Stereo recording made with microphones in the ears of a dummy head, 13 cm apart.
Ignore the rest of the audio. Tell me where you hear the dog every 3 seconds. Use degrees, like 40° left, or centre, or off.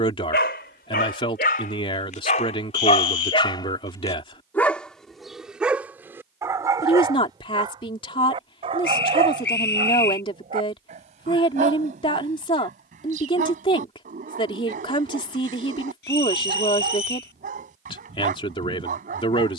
60° left, 10° left, 30° right, 40° right, 50° right, 50° right, 50° right.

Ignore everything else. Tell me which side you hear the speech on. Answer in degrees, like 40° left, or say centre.
30° left.